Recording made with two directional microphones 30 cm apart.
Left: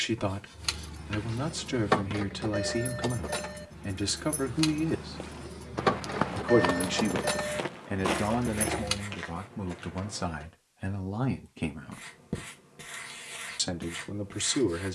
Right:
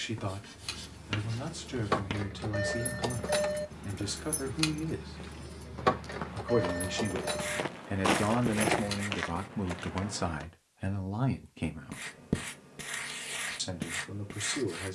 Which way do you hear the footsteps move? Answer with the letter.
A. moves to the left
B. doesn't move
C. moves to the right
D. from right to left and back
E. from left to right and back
D.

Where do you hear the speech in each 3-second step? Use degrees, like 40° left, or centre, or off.
40° left, 40° left, 10° left, 10° right, 40° left.